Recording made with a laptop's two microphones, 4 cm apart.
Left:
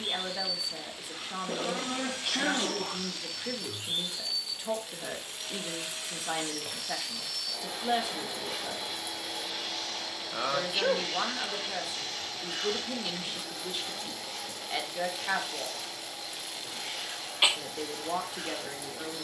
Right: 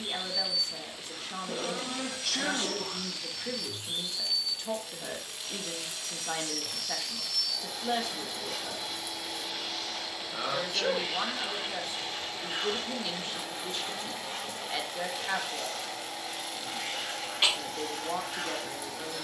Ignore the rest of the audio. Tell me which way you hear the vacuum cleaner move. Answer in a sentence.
In this clip you hear the vacuum cleaner travel towards the right.